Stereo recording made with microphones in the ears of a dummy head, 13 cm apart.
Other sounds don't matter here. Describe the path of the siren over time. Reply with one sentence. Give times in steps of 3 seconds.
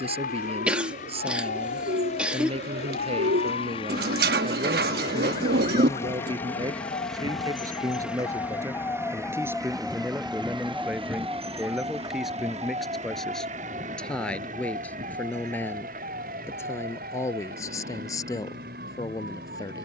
You can hear the siren on the left from 0 s, in the centre from 9 s and on the right from 12 s.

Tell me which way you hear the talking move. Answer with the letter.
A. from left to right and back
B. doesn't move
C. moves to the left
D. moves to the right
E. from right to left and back
C.